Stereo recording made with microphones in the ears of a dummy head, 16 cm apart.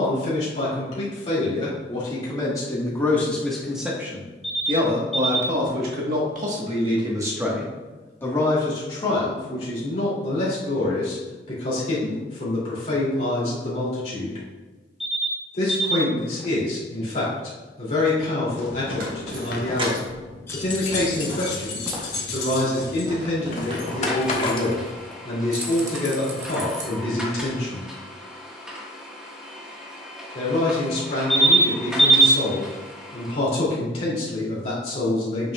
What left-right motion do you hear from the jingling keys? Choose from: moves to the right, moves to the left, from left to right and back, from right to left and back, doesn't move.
from right to left and back.